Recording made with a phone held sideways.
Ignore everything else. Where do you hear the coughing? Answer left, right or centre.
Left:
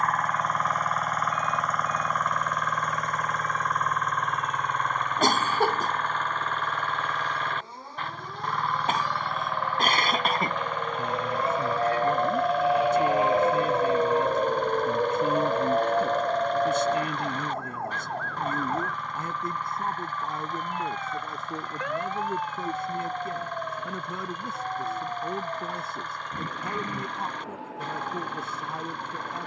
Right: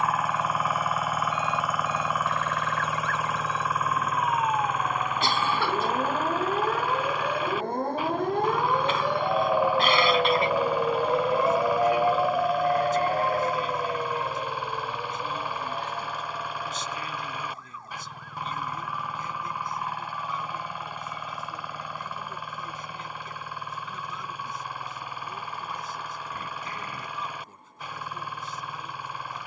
left.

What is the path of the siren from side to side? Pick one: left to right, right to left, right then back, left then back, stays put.
right to left.